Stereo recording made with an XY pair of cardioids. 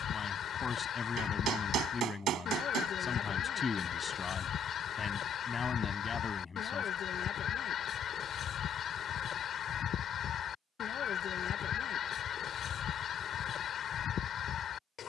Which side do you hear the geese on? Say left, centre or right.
left.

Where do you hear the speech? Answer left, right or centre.
left.